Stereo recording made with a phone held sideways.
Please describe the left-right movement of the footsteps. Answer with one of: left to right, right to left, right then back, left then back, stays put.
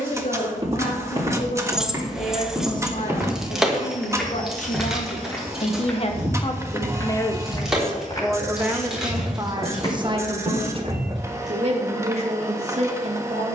right to left.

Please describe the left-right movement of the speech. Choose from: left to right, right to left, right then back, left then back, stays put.
left to right.